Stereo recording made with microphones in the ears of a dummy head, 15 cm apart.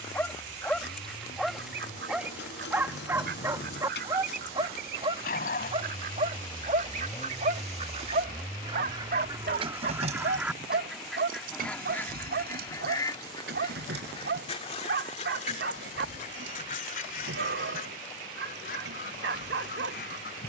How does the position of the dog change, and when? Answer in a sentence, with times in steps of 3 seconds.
In this clip you hear the dog in the centre from 0 s and on the right from 3 s.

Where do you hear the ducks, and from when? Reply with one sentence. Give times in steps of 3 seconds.
In this clip you hear the ducks on the right from 0 s, in the centre from 9 s and on the left from 12 s.